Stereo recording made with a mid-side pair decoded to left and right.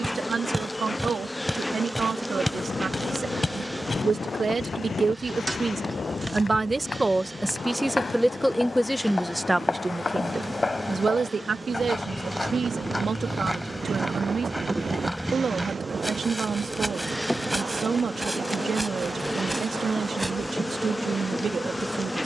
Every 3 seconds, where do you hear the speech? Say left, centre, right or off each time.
right, right, centre, right, right, right, right, right.